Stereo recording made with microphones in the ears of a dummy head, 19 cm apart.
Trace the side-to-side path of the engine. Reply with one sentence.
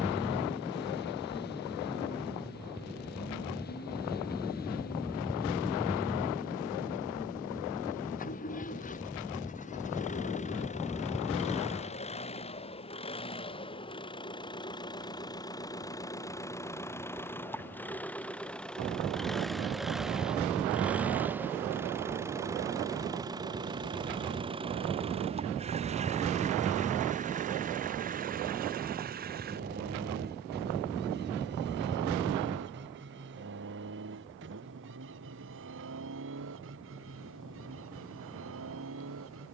You can hear the engine move from left to right.